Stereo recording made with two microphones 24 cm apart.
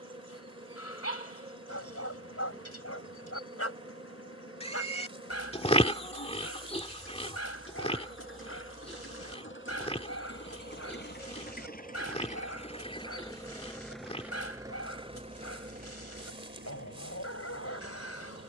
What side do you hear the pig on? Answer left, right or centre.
left.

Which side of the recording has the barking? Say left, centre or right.
left.